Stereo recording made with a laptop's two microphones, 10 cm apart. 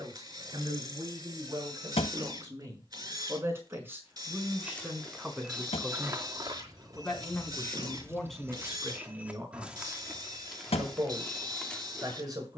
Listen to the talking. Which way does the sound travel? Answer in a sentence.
In this clip you hear the talking move from right to left and back again.